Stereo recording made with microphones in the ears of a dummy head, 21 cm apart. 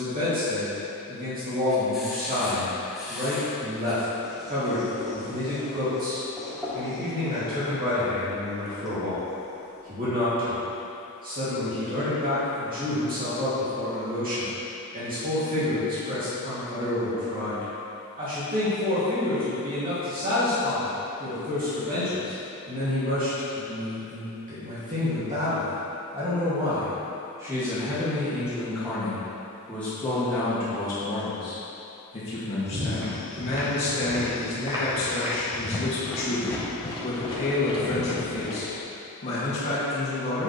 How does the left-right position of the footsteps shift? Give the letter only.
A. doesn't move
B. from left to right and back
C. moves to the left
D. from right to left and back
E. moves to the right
C.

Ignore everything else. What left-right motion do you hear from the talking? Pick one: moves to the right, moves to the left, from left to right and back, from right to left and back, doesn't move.
moves to the left.